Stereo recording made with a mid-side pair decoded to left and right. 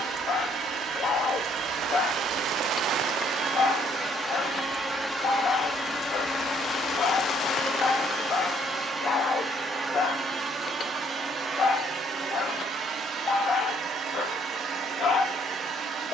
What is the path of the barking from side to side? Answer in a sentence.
In this clip you hear the barking stay put.